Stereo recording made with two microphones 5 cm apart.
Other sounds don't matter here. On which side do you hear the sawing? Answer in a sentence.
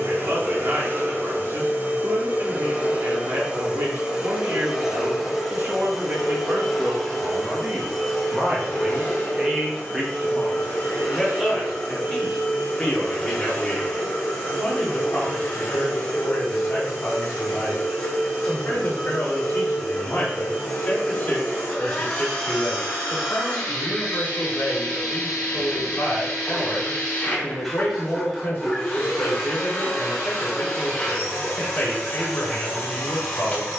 In this clip you hear the sawing in the centre.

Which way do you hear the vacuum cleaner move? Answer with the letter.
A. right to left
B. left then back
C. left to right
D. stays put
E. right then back
A.